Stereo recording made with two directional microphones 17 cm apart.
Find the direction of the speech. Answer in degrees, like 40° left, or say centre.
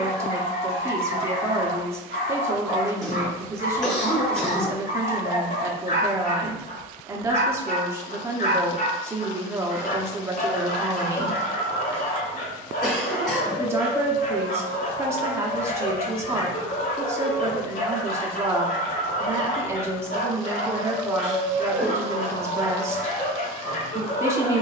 20° right.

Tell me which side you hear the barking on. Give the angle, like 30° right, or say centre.
60° left.